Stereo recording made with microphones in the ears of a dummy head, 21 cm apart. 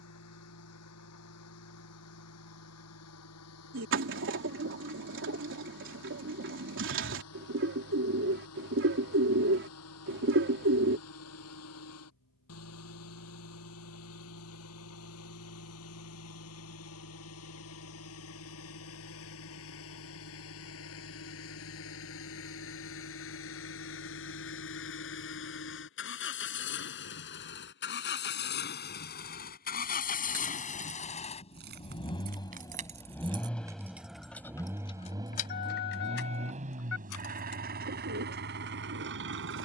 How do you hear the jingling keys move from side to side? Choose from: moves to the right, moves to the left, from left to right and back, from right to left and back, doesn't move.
moves to the left.